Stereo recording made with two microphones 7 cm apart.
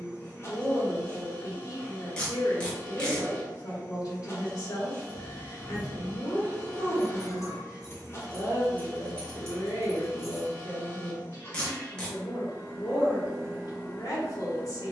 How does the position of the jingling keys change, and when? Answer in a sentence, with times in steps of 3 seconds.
You can hear the jingling keys not at all from 0 s, in the centre from 3 s, on the left from 6 s, in the centre from 9 s and not at all from 12 s.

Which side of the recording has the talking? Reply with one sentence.
You can hear the talking on the left.